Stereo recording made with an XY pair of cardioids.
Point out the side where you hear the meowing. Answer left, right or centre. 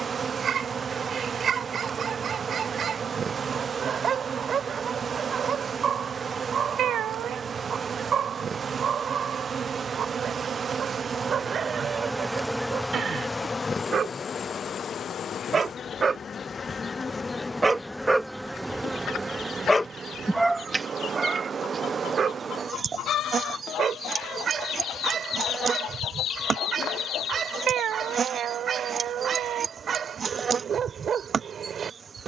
right.